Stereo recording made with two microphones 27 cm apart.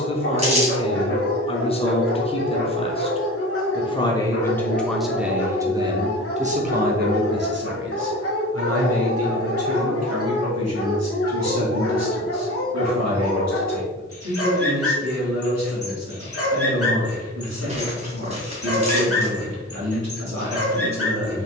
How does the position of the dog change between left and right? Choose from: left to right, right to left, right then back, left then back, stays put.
stays put.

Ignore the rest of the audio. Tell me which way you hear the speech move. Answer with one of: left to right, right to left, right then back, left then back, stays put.
left to right.